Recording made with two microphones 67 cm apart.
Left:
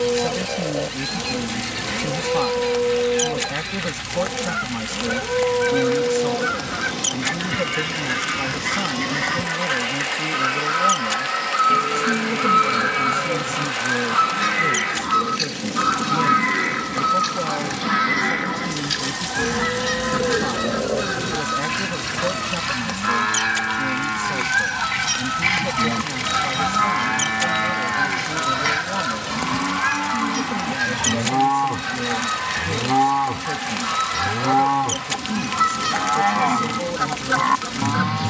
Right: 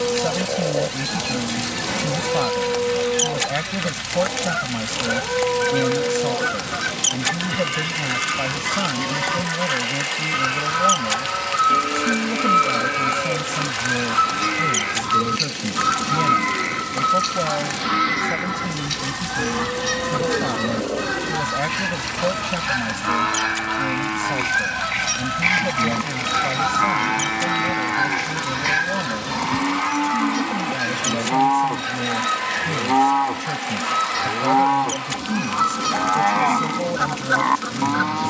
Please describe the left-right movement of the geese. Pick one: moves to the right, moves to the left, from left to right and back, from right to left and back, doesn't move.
moves to the left.